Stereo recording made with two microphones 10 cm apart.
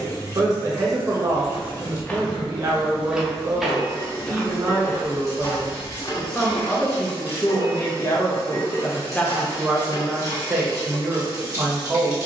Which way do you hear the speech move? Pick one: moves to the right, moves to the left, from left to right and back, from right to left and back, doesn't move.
from right to left and back.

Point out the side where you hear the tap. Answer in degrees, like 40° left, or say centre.
30° left.